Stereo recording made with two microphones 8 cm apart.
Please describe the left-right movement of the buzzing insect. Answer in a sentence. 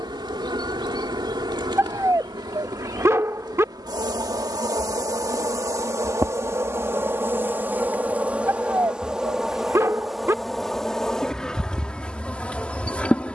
You can hear the buzzing insect go from the right side to the left.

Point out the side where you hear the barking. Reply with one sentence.
In this clip you hear the barking on the right.